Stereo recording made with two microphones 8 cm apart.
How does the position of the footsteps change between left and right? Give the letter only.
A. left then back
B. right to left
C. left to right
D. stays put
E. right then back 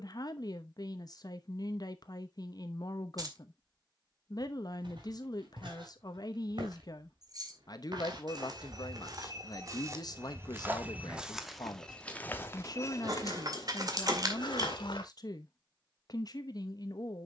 B.